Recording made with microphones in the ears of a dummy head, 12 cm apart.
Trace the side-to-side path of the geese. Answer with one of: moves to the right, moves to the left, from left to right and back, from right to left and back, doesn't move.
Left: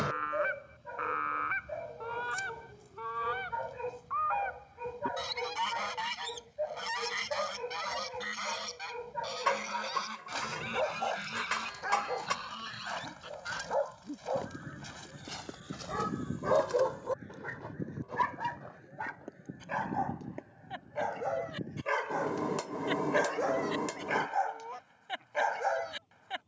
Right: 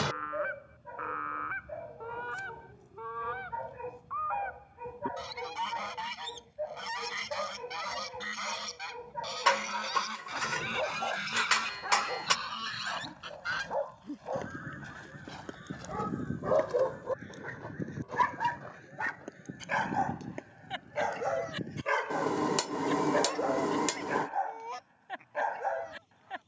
moves to the right.